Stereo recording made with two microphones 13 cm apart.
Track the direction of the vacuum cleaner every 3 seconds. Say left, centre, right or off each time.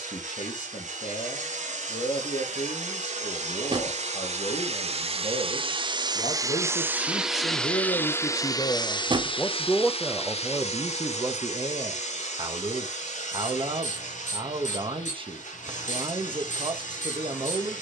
right, right, centre, left, left, left.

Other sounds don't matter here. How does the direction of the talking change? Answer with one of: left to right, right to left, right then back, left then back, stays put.
left to right.